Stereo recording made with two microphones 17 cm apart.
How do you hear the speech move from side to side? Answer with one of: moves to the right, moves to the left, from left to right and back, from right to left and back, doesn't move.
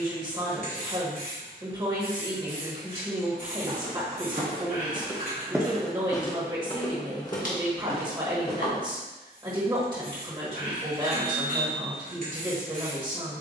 doesn't move.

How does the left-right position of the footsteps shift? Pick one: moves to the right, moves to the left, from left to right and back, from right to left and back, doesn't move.
moves to the left.